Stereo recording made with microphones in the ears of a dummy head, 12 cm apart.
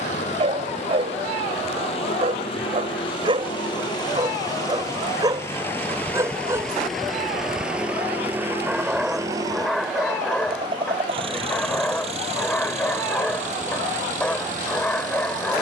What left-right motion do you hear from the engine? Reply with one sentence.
You can hear the engine move to the right.